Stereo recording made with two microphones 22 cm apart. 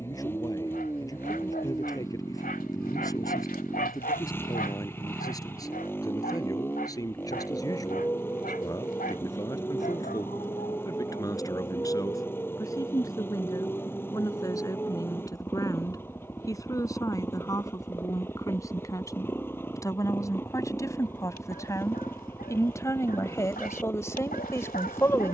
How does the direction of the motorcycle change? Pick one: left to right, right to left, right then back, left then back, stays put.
stays put.